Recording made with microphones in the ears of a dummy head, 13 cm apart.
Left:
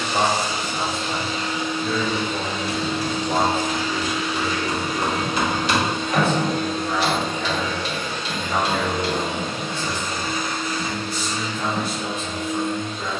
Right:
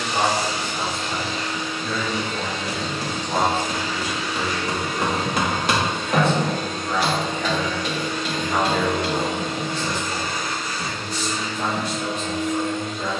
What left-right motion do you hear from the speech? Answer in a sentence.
You can hear the speech go from the left side to the right.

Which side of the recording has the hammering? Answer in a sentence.
In this clip you hear the hammering on the right.